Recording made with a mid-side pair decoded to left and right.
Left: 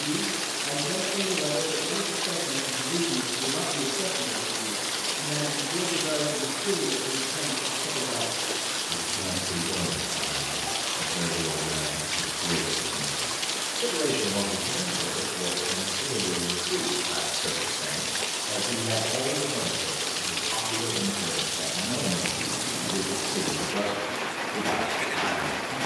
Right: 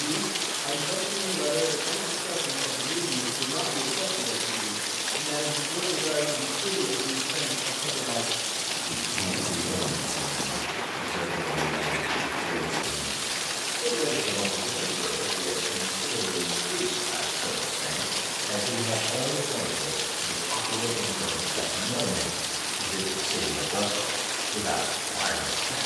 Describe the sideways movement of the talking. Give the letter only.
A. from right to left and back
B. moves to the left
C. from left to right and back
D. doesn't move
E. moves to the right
A.